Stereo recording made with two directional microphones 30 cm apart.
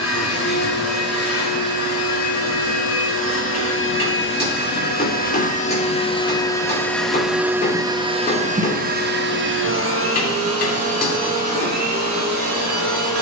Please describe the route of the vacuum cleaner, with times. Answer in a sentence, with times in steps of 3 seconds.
You can hear the vacuum cleaner on the left from 0 s, in the centre from 6 s and on the right from 9 s.